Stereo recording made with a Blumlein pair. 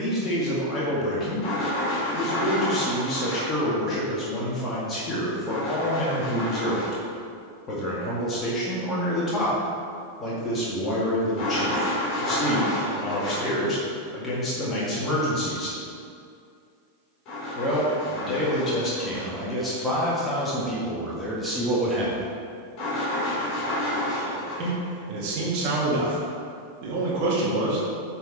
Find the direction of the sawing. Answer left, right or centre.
left.